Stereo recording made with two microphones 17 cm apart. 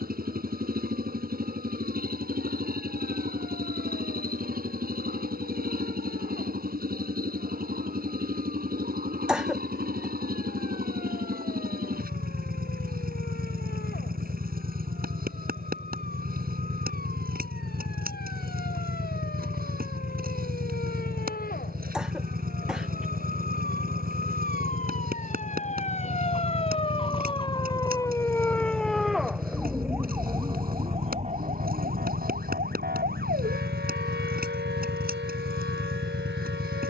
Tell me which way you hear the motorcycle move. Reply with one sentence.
In this clip you hear the motorcycle stay in one place.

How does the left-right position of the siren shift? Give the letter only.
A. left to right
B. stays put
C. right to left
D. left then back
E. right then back
A.